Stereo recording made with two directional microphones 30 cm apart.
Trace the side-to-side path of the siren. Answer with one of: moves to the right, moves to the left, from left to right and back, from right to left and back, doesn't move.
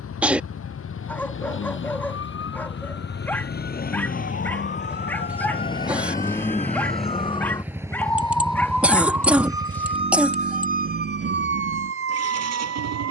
moves to the right.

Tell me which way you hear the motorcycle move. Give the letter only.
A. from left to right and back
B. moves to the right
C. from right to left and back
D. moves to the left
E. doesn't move
B.